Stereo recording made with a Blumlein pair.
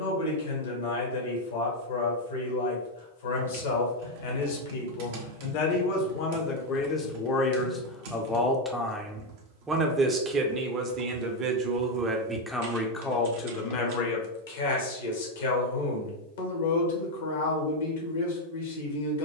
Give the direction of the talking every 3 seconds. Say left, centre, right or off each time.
left, left, left, right, left, left, left.